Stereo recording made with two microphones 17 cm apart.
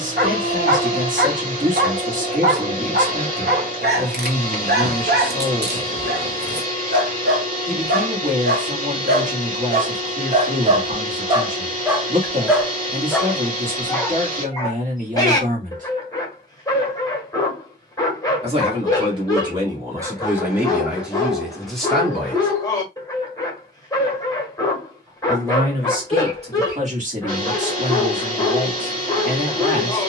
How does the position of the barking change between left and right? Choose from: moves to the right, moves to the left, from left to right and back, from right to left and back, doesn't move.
moves to the left.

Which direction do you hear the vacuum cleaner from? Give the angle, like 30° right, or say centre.
50° right.